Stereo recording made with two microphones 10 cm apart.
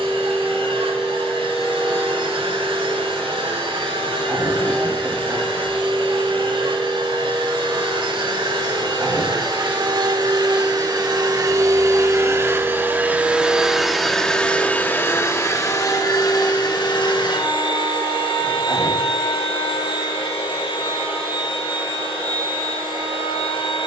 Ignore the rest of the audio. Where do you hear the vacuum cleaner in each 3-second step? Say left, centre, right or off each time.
right, right, right, right, centre, left, left, left.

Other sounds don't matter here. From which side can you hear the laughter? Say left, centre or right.
right.